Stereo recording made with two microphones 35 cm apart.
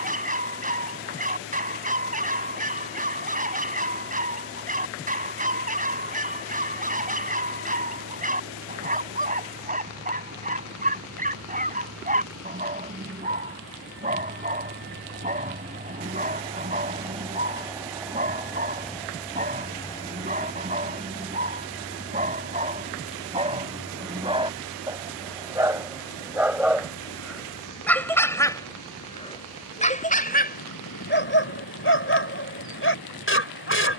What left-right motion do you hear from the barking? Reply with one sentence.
In this clip you hear the barking move to the left.